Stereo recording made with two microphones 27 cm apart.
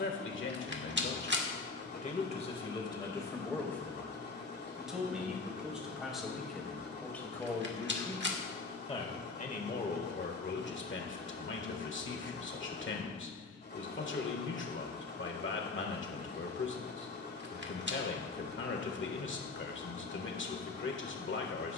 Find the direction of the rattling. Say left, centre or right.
right.